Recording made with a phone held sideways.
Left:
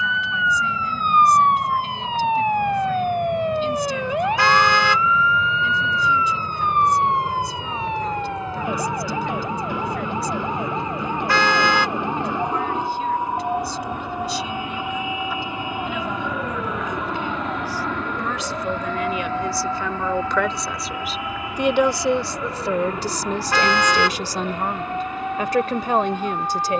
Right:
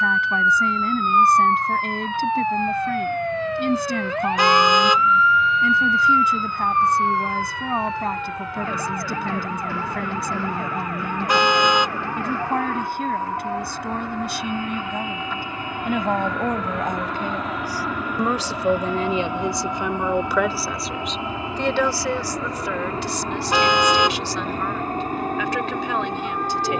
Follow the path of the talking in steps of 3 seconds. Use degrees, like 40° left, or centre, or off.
60° right, 60° right, 60° right, 60° right, 60° right, 50° right, 20° right, 30° left, 40° left.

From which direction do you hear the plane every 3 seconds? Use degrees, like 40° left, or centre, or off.
50° left, 40° left, 40° left, 30° left, 20° left, centre, 10° right, 30° right, 40° right.